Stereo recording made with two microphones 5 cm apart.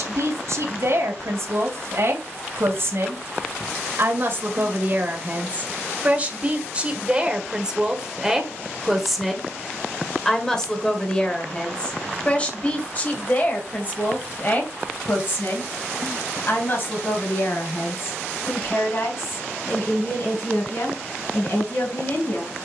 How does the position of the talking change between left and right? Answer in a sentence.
You can hear the talking move from right to left.